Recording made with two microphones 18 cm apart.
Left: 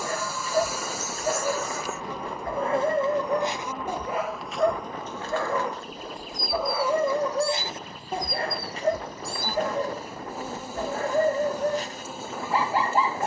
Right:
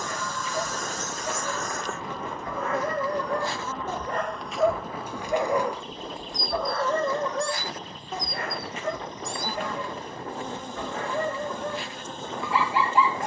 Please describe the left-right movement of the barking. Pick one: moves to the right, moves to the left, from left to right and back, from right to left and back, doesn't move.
from left to right and back.